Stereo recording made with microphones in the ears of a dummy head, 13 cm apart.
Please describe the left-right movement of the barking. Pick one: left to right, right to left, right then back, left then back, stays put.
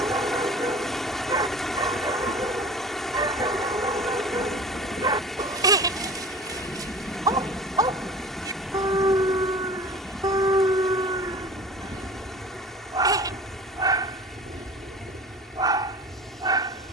stays put.